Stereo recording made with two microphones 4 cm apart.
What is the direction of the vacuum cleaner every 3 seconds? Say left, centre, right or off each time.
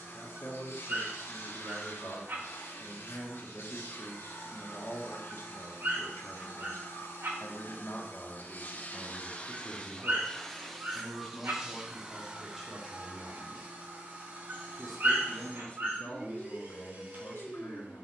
left, left, left, centre, right, right.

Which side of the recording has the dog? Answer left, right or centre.
right.